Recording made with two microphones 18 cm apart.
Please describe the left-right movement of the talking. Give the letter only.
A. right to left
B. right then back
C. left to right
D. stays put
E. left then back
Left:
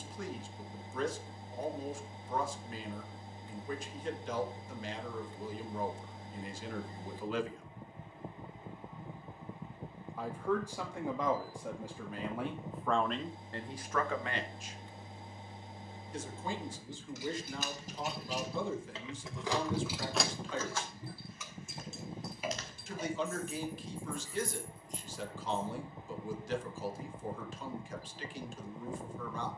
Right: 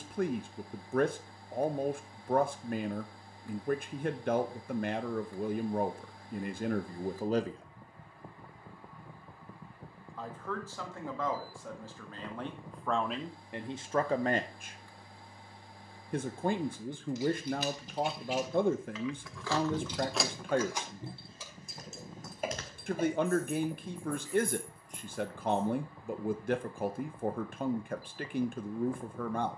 E.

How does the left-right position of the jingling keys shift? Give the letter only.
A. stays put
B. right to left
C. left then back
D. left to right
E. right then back
D.